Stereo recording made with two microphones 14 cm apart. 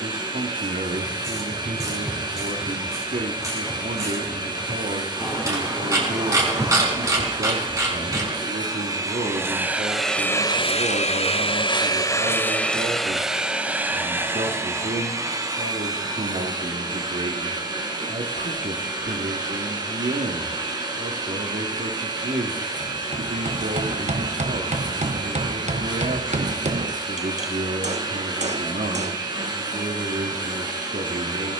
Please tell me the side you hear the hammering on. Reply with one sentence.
You can hear the hammering on the right.